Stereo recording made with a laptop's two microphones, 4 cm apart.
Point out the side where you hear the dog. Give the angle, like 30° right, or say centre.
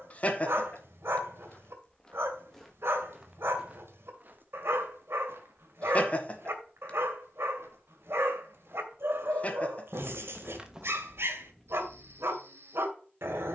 70° right.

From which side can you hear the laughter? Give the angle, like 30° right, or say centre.
30° left.